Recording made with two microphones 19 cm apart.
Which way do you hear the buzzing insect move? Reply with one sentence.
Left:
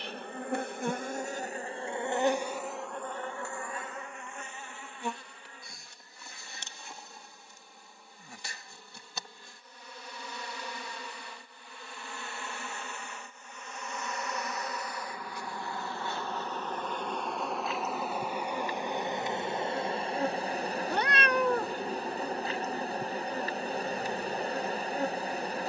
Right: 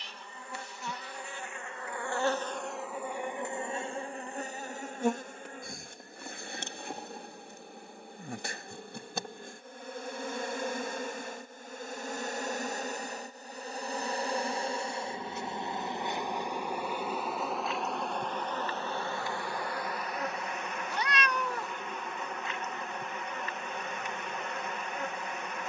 You can hear the buzzing insect go right and come back.